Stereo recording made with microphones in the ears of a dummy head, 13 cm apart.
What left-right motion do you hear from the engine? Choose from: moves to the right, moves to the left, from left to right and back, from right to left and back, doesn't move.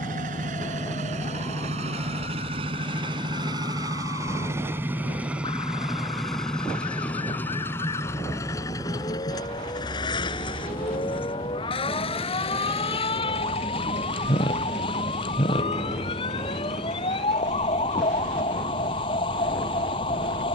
moves to the left.